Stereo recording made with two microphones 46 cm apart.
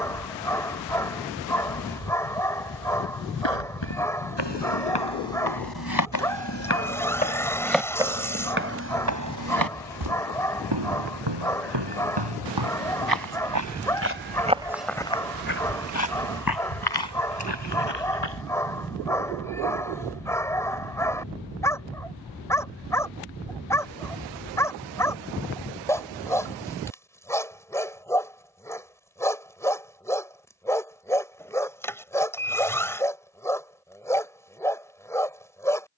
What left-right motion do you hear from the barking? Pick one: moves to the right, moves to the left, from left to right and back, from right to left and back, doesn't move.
doesn't move.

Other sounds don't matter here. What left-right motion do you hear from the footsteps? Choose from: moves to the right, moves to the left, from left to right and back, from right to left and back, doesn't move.
from left to right and back.